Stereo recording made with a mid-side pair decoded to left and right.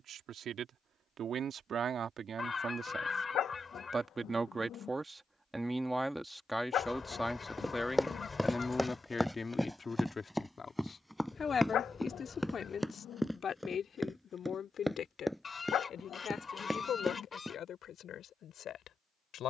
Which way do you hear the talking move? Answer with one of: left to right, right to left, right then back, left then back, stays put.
right to left.